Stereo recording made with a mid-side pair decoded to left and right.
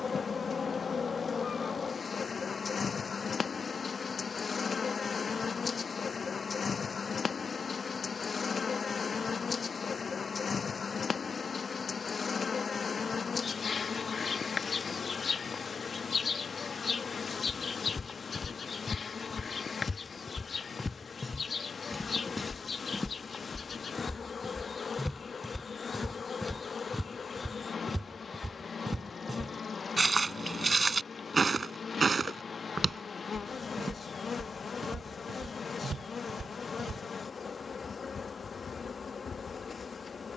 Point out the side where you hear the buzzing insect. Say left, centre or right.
left.